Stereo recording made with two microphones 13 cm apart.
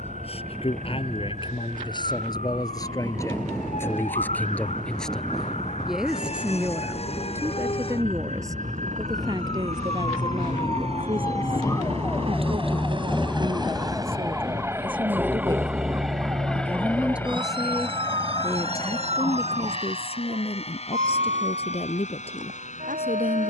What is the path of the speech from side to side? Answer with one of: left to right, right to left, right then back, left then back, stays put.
right then back.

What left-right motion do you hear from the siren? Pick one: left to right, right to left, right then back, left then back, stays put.
left to right.